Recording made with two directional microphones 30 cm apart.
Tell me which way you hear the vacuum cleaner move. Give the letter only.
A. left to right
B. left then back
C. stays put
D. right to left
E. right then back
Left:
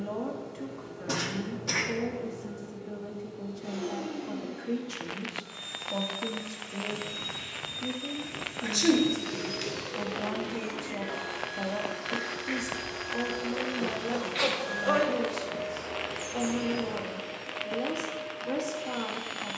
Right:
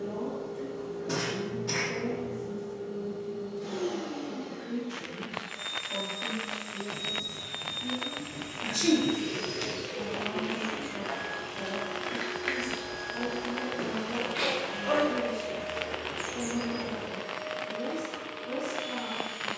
B.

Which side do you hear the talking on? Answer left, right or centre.
left.